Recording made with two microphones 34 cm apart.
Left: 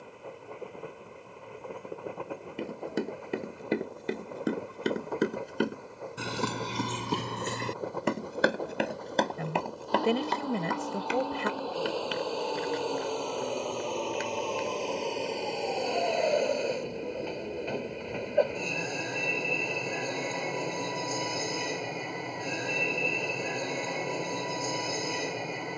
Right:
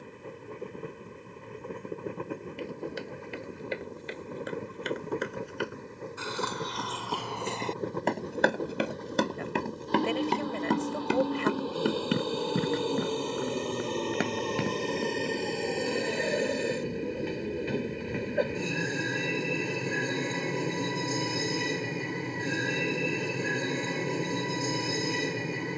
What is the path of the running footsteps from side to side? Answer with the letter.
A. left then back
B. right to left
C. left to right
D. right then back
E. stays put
C.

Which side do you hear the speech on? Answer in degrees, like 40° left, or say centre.
60° left.